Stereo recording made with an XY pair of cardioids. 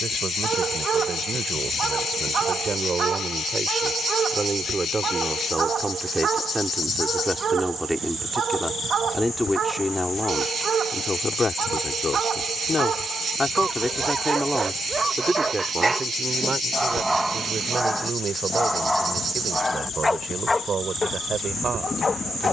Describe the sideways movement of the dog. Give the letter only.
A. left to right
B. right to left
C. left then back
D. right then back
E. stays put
B.